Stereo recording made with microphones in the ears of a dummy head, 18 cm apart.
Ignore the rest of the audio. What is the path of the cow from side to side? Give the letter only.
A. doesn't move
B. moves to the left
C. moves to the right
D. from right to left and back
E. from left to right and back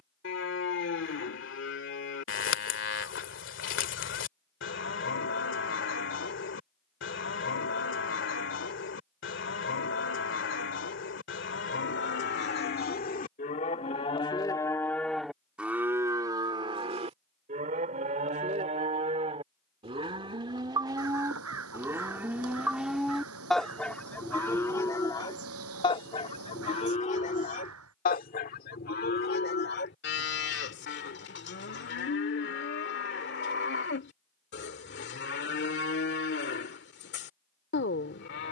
E.